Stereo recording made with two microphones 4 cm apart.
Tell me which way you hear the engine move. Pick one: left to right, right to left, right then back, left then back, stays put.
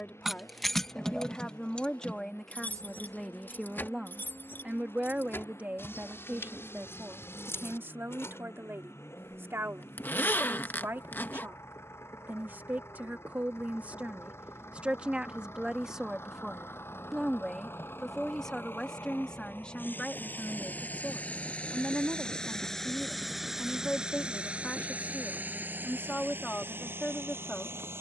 left to right.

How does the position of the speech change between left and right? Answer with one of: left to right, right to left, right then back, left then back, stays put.
right then back.